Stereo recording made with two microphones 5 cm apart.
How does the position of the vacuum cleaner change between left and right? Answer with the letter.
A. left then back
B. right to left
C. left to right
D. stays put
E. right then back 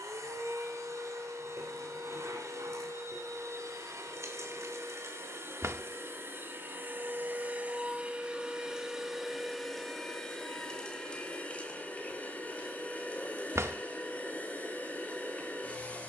B.